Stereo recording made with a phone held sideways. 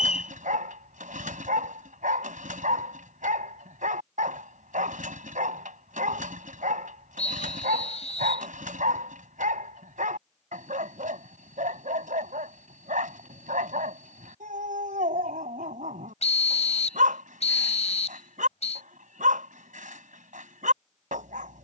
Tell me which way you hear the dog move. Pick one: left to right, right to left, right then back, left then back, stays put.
stays put.